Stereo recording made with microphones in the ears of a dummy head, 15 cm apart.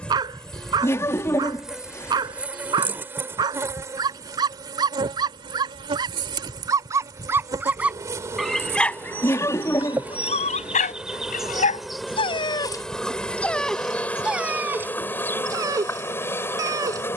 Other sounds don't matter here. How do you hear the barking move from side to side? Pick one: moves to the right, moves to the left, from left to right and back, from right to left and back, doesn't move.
from right to left and back.